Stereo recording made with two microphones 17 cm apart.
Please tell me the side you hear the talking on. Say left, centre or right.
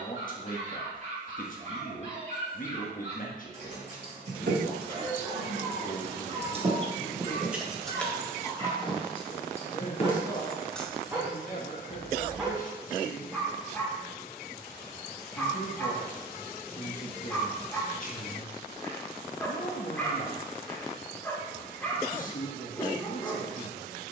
left.